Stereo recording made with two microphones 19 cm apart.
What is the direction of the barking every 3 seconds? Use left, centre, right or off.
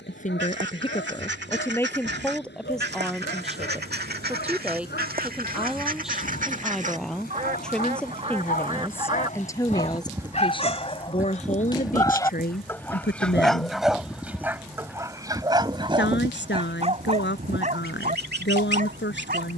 left, left, left, left, centre, right, right.